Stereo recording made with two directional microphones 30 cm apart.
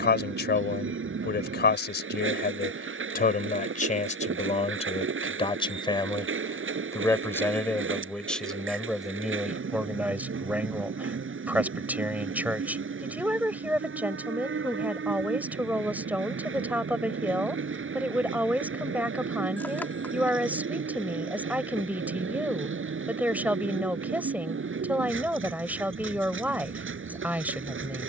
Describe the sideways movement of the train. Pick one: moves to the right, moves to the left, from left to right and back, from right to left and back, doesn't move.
doesn't move.